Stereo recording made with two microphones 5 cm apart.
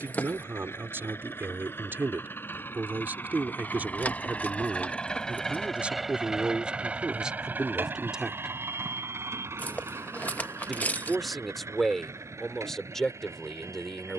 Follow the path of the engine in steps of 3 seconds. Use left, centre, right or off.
left, left, right, right, right.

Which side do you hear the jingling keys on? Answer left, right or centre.
left.